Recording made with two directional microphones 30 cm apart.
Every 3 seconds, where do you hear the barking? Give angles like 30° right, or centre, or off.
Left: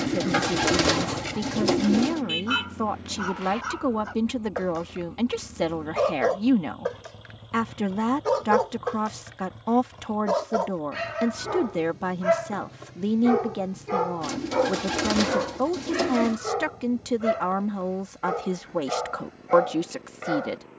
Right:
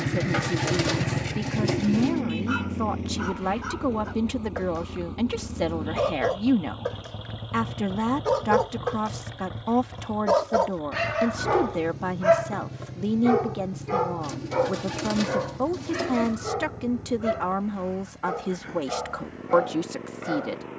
20° left, 20° left, 10° left, 30° right, 10° right, 10° left, 20° left.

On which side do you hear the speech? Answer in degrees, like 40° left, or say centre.
10° left.